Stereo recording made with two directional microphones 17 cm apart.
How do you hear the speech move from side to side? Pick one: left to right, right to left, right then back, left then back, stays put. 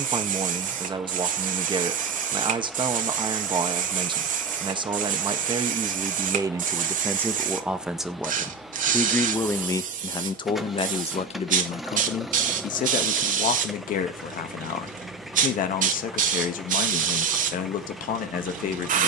right to left.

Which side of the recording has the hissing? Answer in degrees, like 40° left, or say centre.
50° right.